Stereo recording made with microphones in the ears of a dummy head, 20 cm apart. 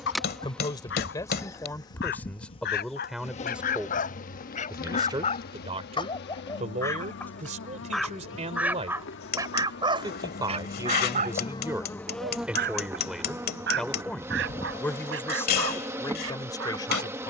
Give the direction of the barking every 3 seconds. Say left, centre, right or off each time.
left, left, centre, right, right, right.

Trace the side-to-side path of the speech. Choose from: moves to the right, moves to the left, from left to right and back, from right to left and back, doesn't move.
from left to right and back.